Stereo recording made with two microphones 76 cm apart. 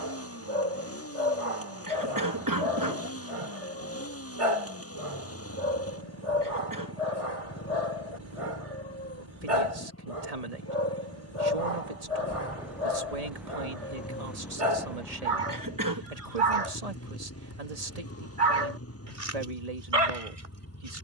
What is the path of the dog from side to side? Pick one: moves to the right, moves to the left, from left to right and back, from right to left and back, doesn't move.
doesn't move.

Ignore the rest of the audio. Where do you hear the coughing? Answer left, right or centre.
right.